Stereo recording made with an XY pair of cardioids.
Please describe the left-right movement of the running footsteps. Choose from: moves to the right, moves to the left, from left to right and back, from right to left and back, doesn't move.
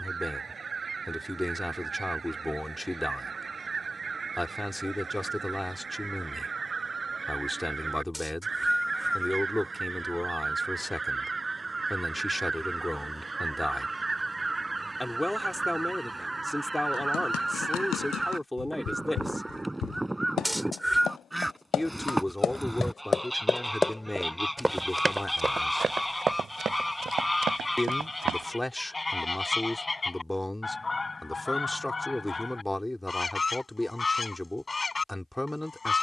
moves to the right.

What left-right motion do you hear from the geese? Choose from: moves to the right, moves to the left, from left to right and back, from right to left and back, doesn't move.
moves to the left.